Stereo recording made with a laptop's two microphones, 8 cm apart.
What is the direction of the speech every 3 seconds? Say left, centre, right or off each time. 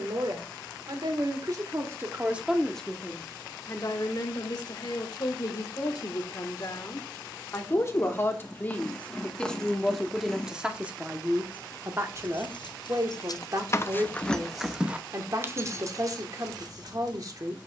right, left, left, centre, right, right.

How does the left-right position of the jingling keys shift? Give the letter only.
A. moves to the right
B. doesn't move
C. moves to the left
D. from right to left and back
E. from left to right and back
A.